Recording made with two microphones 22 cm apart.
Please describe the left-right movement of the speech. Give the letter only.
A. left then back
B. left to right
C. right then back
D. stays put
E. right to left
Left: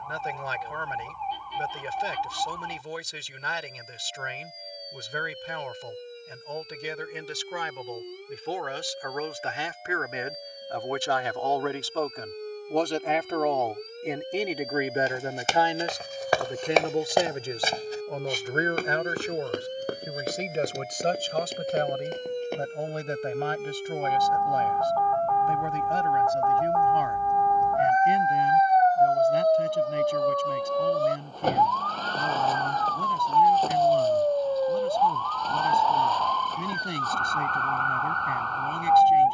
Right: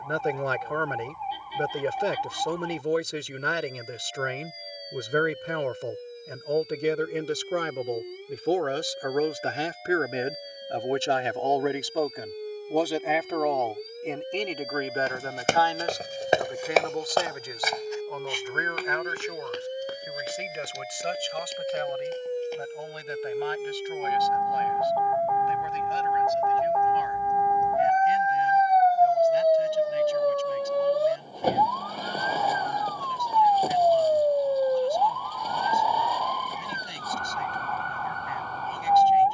E.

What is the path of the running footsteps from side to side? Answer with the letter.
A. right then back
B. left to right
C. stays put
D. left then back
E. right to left
E.